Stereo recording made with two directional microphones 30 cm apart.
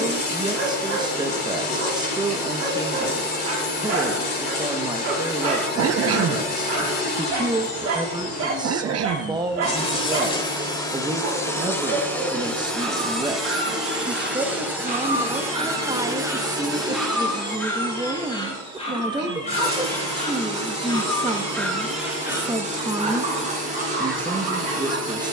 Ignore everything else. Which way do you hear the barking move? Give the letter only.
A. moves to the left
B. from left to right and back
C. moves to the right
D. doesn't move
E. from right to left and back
E.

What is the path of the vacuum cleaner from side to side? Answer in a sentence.
You can hear the vacuum cleaner go from the left side to the right.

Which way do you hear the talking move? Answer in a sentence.
In this clip you hear the talking stay in one place.